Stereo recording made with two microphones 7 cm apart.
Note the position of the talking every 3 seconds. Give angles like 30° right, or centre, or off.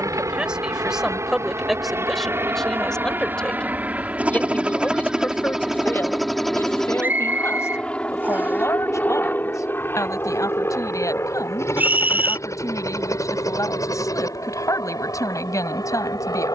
centre, 20° left, 40° left, 50° left, 50° left, 50° left.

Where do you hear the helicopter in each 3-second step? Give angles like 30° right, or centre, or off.
40° right, 20° right, 10° left, 30° left, 50° left, 50° left.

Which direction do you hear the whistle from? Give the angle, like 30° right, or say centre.
30° right.